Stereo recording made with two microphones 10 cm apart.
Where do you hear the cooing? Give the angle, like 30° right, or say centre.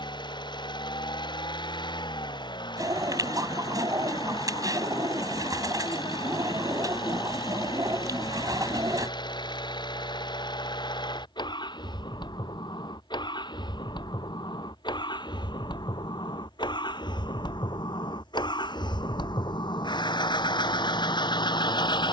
40° right.